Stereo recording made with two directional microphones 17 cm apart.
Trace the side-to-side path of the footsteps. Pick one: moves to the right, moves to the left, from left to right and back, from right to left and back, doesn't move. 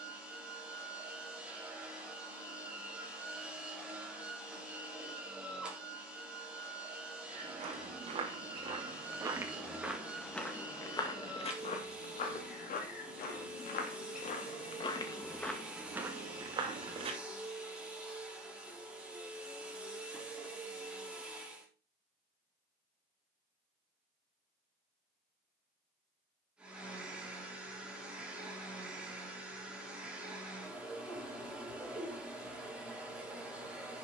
from right to left and back.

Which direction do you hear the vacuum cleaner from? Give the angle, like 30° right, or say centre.
10° right.